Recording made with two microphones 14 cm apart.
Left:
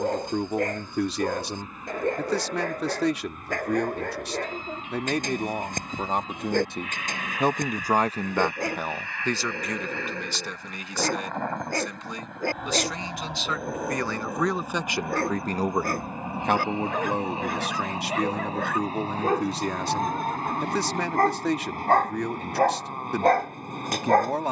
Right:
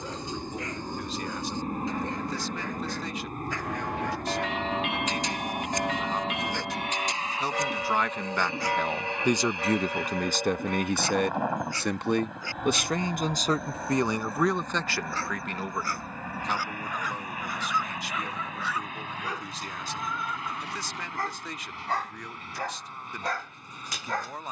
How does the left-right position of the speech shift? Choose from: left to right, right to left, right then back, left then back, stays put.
right then back.